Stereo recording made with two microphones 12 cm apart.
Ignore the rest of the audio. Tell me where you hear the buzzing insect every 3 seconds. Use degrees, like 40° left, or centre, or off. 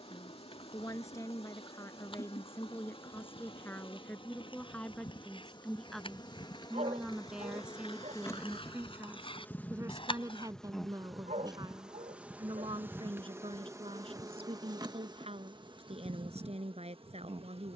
50° left, 40° left, 30° left, 10° left, 20° right, 40° right.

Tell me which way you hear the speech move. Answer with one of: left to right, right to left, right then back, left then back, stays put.
left to right.